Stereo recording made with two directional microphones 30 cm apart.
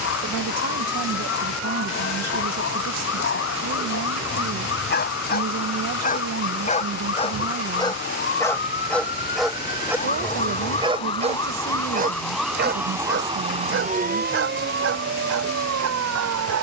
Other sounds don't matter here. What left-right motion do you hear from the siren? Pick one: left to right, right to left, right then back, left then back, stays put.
left to right.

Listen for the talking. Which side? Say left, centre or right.
right.